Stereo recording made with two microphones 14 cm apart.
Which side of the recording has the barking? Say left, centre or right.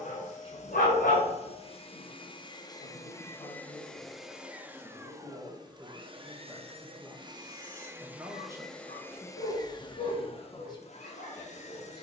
left.